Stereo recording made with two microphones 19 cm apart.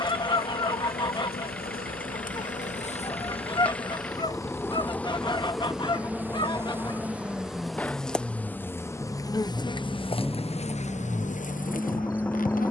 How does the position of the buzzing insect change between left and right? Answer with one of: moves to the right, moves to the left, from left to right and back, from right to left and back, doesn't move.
from left to right and back.